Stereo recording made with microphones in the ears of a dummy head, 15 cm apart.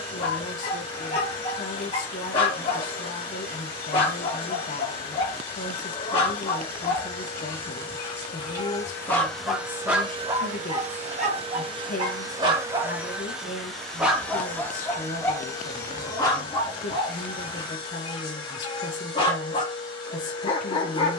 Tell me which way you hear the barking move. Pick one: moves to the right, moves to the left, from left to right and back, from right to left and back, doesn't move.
from left to right and back.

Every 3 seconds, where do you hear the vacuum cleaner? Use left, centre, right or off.
left, left, left, right, centre, left, left.